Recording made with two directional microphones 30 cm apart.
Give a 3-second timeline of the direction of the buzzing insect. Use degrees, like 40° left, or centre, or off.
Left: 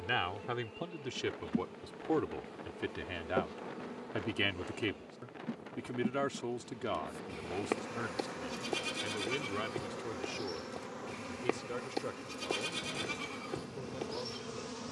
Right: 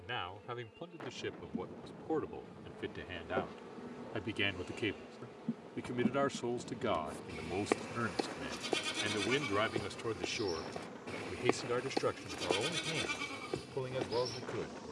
50° left, centre, 10° left, 40° left, 50° left.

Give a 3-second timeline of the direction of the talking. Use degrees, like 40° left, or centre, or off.
30° left, 10° left, 20° right, 40° right, 50° right.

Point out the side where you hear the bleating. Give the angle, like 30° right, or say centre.
10° right.